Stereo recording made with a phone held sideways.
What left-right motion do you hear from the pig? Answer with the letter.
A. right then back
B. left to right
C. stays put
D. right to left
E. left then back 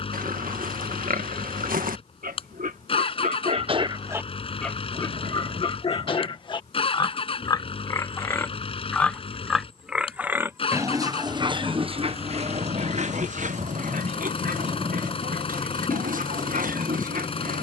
E.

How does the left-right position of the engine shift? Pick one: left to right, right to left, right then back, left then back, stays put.
stays put.